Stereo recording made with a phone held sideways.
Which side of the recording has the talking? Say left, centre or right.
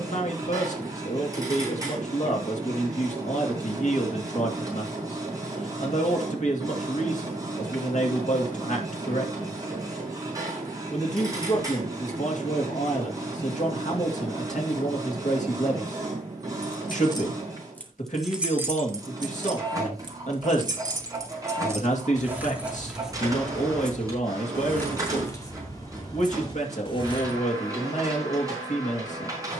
left.